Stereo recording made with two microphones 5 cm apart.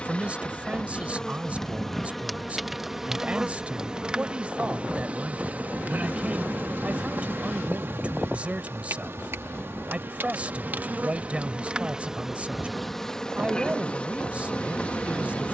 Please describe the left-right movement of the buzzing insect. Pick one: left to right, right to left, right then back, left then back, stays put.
right then back.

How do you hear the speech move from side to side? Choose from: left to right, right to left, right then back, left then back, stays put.
stays put.